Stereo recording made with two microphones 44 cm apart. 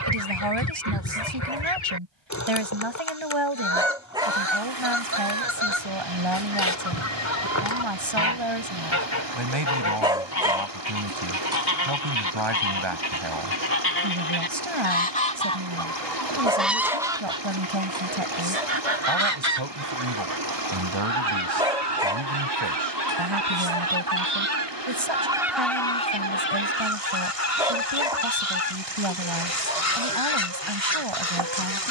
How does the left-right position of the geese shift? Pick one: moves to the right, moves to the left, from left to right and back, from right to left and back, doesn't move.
from left to right and back.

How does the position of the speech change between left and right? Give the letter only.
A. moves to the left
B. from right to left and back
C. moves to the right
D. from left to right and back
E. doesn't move
E.